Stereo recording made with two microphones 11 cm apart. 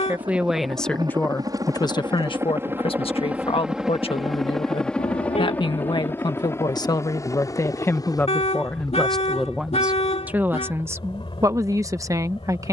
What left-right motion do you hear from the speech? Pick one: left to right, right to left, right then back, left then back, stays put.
left then back.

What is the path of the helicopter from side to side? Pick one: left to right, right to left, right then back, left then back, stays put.
right to left.